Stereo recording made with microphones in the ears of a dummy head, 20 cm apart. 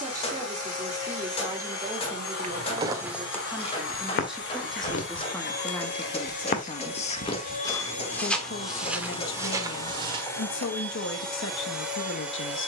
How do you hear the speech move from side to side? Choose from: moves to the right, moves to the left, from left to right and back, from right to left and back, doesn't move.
moves to the left.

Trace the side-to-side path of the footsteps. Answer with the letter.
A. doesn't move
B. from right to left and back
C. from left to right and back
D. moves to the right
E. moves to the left
B.